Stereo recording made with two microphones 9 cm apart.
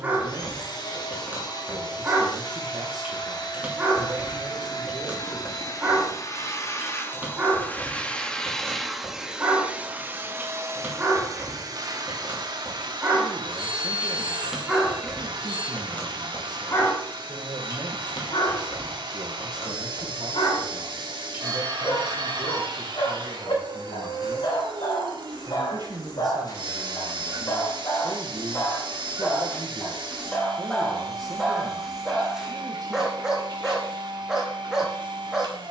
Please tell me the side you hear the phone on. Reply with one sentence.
You can hear the phone on the right.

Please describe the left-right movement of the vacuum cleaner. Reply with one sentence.
In this clip you hear the vacuum cleaner go from the left side to the right.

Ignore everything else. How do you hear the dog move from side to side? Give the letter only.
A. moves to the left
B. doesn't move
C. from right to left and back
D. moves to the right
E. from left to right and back
C.